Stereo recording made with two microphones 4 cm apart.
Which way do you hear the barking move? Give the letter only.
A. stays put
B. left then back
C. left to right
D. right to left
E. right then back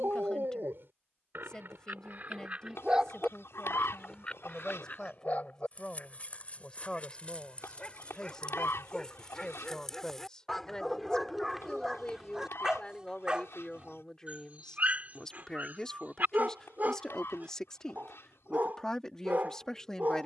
B.